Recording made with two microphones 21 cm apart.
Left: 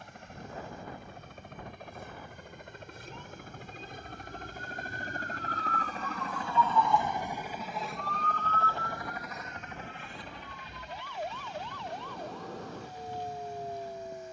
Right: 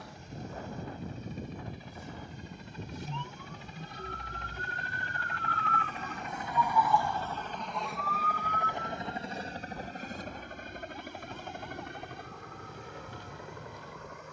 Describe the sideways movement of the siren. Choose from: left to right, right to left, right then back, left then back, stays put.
right to left.